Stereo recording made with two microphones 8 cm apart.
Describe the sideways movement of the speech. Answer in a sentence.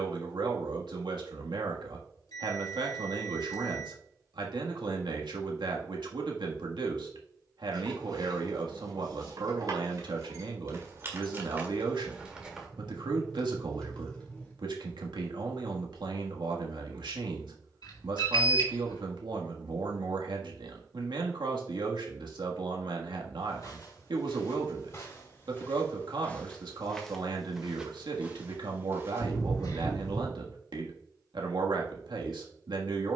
In this clip you hear the speech stay in one place.